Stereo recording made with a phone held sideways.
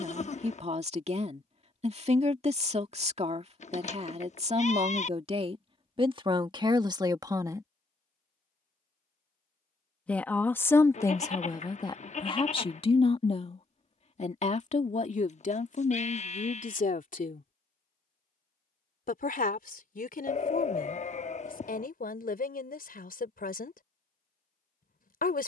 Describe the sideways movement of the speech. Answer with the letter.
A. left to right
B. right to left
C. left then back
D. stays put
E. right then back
B.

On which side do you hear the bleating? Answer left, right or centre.
left.